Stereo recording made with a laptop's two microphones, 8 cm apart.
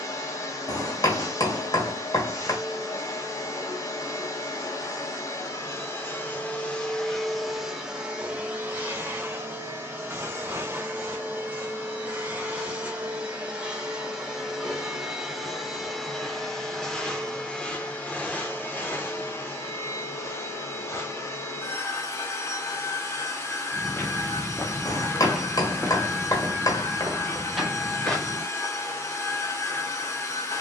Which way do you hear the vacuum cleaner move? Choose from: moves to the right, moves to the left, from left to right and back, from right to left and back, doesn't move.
from left to right and back.